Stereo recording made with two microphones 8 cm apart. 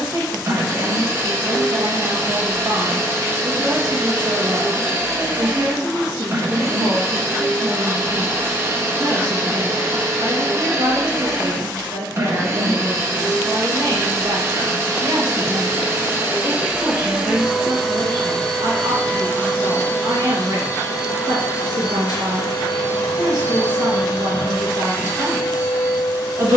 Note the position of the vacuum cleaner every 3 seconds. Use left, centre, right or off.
right, right, right, right, right, right, left, left, left.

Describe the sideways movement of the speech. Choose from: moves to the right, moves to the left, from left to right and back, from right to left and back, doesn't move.
doesn't move.